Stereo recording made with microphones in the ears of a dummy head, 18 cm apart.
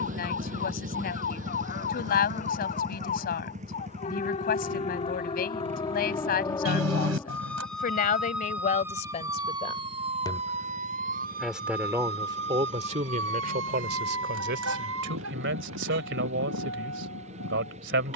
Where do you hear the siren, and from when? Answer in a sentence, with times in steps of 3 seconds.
You can hear the siren on the left from 0 s, in the centre from 6 s and on the right from 9 s.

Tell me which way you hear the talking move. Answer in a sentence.
In this clip you hear the talking travel towards the right.